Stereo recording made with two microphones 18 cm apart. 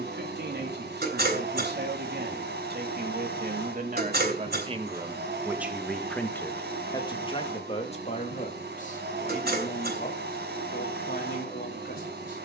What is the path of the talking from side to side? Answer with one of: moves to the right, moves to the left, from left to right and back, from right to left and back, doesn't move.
moves to the left.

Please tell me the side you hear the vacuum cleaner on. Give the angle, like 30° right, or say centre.
70° right.